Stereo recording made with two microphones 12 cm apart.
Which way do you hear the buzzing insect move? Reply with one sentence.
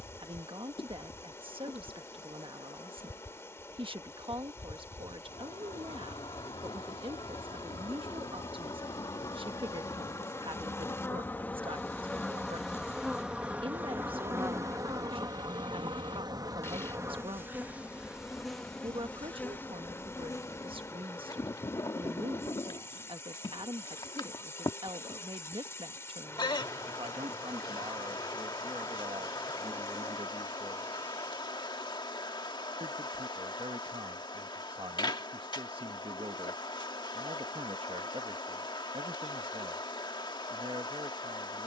You can hear the buzzing insect go right and come back.